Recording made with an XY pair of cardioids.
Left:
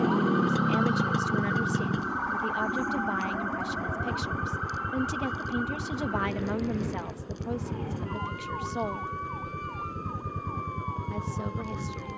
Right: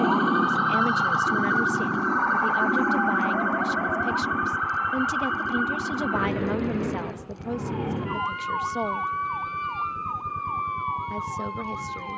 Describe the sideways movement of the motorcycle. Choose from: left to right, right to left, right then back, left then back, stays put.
stays put.